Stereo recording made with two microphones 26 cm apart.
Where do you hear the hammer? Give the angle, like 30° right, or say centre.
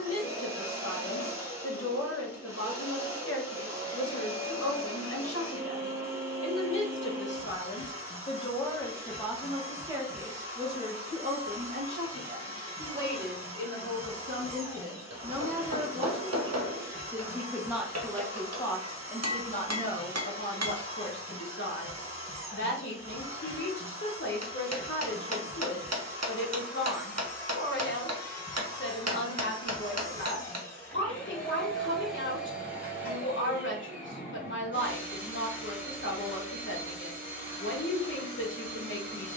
70° right.